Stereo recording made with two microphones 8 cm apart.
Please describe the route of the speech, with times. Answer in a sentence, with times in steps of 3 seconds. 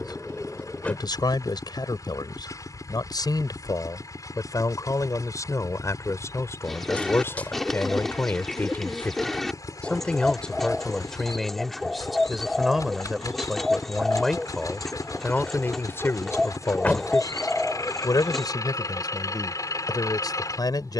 In this clip you hear the speech on the left from 0 s, in the centre from 9 s and on the left from 15 s.